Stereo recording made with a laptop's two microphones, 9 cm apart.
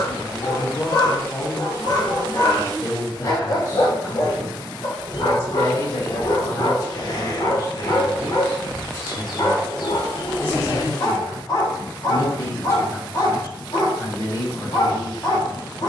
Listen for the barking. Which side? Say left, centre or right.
left.